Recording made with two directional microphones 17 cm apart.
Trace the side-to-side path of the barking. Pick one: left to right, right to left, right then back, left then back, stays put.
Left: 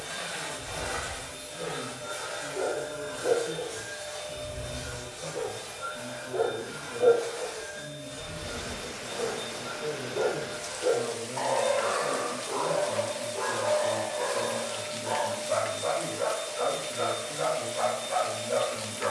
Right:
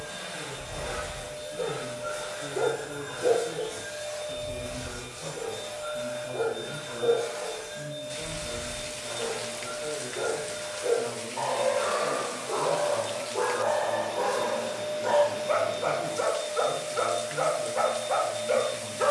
left then back.